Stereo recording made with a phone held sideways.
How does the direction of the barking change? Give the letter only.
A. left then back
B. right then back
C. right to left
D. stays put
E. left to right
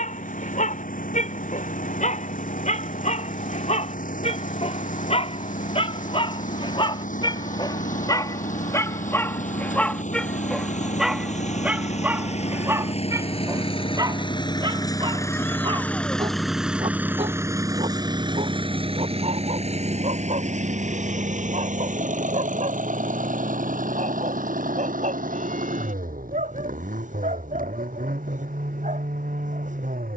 E.